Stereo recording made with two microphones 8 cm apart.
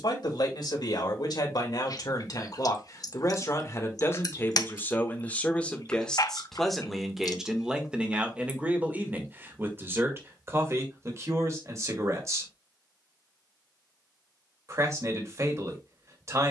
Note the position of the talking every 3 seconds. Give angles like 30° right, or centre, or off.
60° left, 30° left, 10° right, 30° right, 40° right, 40° right.